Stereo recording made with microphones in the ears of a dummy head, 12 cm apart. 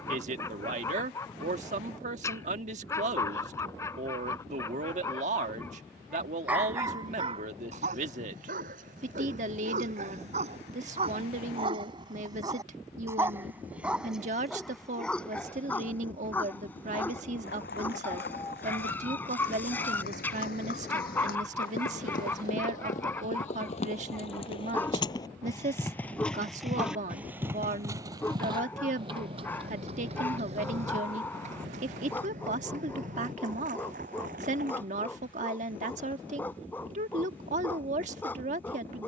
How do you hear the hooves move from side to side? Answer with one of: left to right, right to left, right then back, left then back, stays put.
left to right.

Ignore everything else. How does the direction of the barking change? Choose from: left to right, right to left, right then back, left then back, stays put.
right then back.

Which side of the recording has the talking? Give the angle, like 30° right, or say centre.
60° right.